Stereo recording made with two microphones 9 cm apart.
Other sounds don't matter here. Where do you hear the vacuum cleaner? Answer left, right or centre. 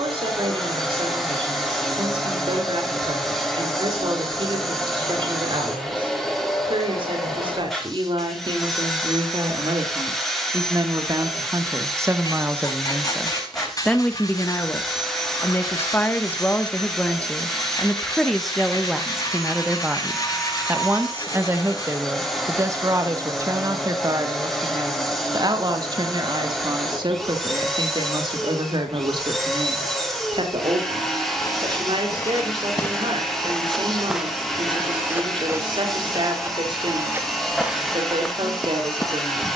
centre.